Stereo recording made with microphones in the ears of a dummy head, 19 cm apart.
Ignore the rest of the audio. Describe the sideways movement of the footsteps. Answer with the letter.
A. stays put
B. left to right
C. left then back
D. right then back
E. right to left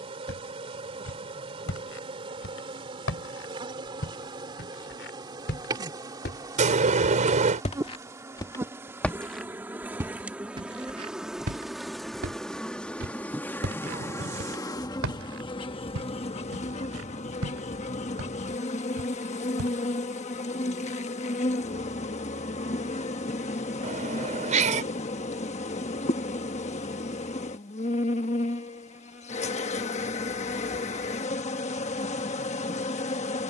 B.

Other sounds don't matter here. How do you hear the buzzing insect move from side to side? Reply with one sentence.
In this clip you hear the buzzing insect go from the right side to the left.